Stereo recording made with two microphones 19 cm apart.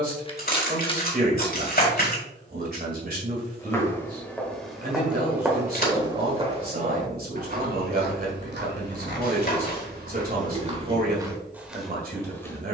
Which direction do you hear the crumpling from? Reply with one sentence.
In this clip you hear the crumpling on the left.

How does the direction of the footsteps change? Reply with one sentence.
You can hear the footsteps go right and come back.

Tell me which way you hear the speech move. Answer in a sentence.
You can hear the speech stay in one place.